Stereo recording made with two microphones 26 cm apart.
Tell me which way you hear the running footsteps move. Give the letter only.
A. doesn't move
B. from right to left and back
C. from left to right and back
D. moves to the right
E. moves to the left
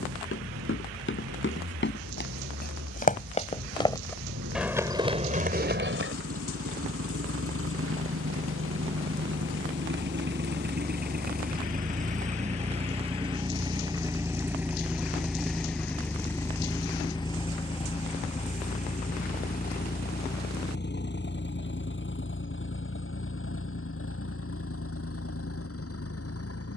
D.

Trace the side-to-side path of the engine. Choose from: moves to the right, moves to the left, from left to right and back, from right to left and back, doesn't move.
moves to the left.